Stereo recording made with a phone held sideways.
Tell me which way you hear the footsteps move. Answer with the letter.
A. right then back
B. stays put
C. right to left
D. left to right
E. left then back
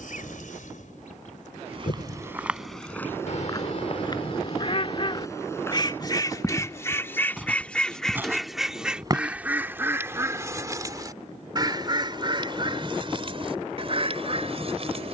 E.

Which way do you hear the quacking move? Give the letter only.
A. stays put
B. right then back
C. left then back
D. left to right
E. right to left
D.